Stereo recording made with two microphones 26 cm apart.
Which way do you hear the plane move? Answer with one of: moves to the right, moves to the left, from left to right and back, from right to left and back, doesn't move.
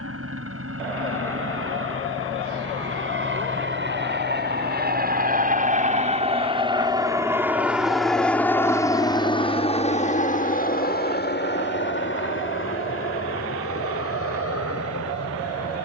moves to the left.